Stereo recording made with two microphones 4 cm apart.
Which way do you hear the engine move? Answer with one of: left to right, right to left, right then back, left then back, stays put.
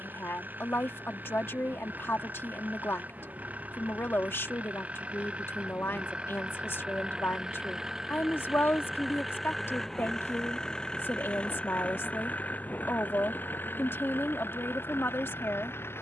right to left.